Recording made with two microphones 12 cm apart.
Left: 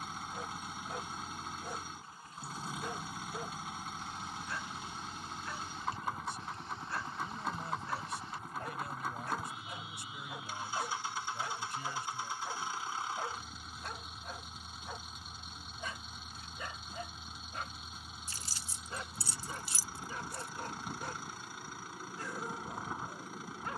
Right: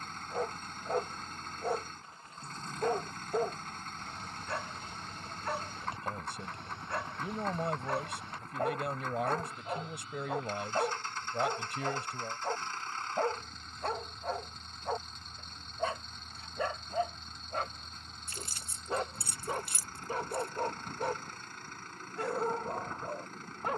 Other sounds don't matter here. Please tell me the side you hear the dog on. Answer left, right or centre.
right.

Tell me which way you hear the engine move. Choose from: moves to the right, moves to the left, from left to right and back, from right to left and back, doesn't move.
doesn't move.